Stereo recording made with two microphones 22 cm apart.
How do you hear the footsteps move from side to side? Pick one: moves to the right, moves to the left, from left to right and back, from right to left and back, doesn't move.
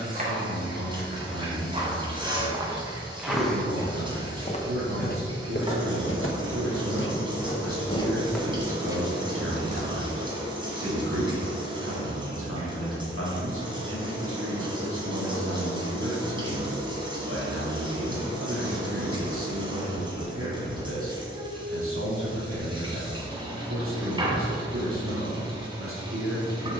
from right to left and back.